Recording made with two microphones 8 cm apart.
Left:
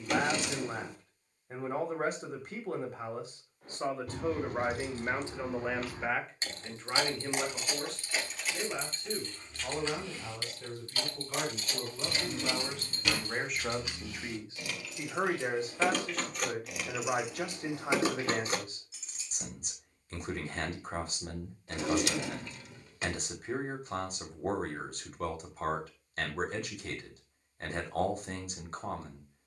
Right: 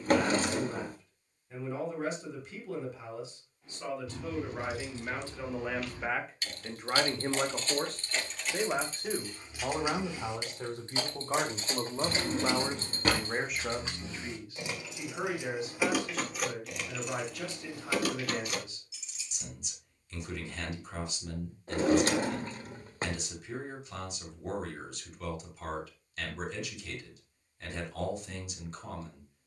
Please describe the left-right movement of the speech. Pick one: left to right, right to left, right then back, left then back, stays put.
right then back.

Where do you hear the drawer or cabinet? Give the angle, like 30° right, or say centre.
40° right.